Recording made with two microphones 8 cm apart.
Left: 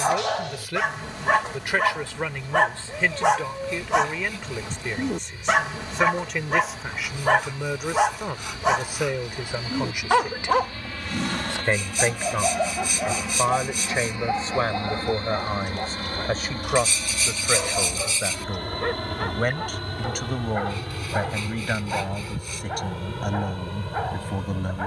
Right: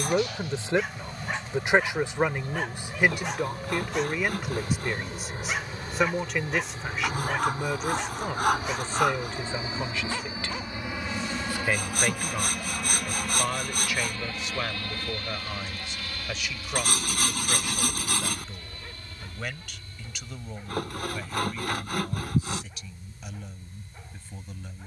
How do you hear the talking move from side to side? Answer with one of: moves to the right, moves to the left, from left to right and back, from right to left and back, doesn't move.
moves to the left.